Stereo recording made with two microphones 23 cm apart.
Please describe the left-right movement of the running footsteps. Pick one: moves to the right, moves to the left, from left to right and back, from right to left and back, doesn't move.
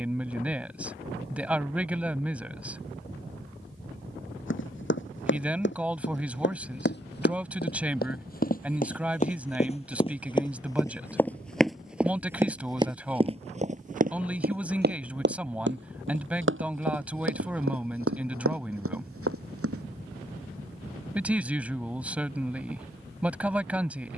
moves to the right.